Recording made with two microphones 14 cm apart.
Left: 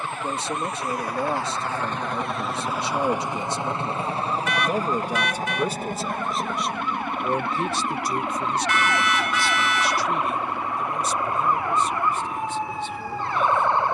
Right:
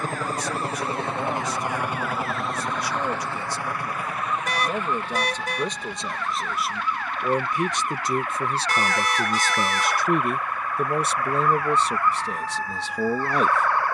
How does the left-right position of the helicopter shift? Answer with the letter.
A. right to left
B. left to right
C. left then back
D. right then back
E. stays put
A.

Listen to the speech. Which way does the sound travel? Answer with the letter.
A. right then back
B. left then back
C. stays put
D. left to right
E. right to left
D.